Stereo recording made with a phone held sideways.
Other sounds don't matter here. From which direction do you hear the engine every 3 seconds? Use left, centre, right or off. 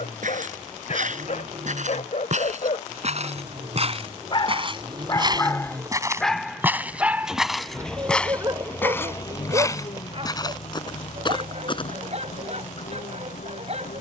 right, right, centre, left, left.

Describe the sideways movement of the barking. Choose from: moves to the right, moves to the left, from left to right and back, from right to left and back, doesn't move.
moves to the right.